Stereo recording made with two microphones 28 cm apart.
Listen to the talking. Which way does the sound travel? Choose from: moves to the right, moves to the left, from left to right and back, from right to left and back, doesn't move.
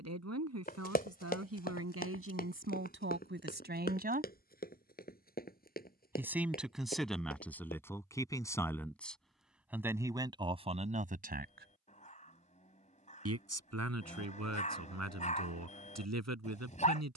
from right to left and back.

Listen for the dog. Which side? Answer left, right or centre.
left.